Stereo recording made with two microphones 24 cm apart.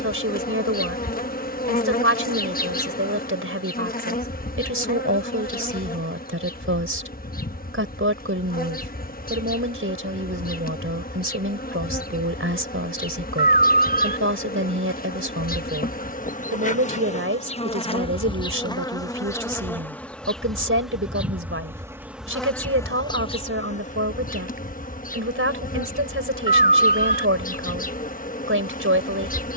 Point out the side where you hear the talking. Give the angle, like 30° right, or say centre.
60° right.